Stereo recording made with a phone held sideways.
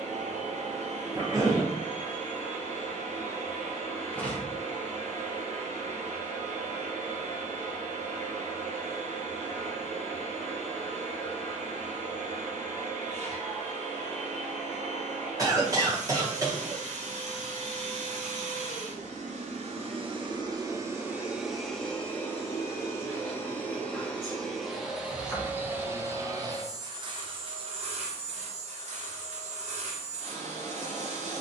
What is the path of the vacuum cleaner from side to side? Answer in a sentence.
You can hear the vacuum cleaner go left and come back.